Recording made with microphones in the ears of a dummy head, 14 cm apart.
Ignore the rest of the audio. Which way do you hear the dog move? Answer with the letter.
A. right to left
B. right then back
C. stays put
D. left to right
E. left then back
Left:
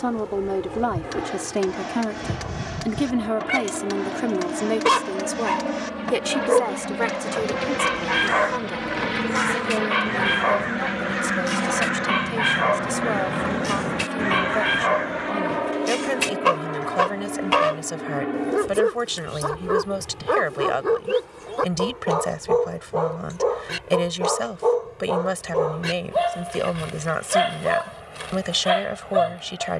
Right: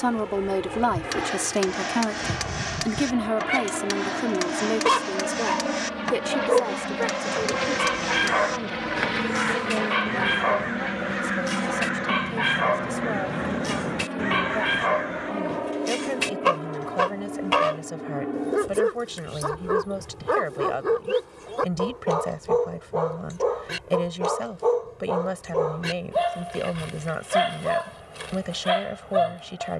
C.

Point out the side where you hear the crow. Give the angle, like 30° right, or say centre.
10° left.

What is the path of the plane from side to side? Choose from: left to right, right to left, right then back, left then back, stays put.
right to left.